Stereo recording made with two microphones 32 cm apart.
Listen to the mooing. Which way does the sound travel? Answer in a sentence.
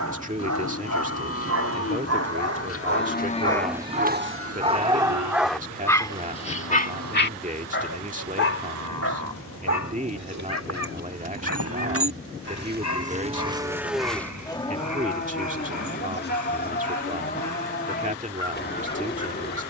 You can hear the mooing move from left to right and back again.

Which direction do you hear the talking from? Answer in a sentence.
You can hear the talking on the right.